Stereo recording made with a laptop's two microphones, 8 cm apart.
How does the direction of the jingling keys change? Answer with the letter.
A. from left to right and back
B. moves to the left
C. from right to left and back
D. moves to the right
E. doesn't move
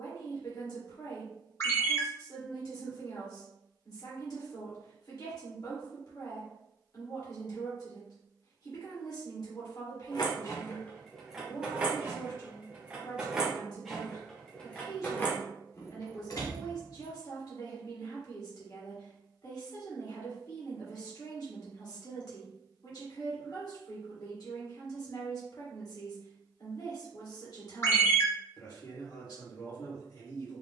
A.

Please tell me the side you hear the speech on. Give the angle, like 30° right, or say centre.
60° left.